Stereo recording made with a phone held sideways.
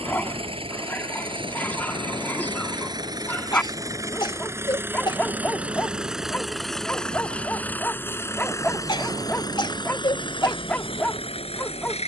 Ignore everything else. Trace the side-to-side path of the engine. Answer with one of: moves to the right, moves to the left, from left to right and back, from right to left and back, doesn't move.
moves to the left.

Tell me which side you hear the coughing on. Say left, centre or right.
left.